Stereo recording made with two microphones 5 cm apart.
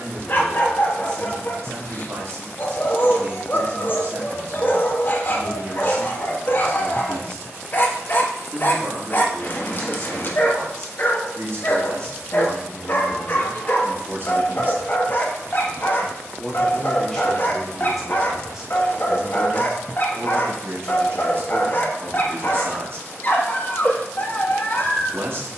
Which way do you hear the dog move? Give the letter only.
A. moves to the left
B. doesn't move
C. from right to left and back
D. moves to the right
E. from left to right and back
B.